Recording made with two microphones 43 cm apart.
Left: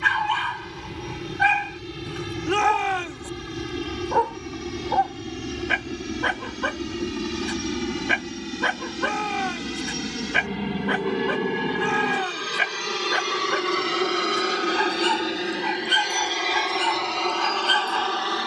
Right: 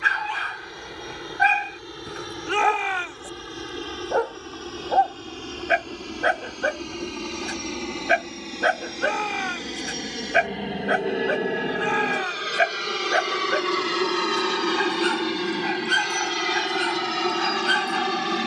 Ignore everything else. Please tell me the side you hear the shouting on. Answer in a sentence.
In this clip you hear the shouting on the left.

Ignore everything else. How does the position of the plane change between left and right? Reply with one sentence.
You can hear the plane go from the left side to the right.